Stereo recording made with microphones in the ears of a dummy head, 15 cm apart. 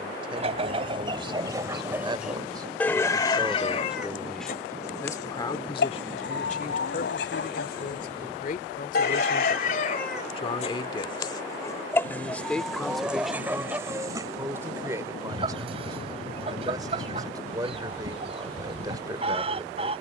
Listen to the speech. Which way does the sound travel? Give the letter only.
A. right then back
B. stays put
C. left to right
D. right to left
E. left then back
E.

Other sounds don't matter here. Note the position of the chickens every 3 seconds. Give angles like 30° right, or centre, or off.
20° right, 50° left, 70° left, 40° left, 10° right, 30° right, 30° right.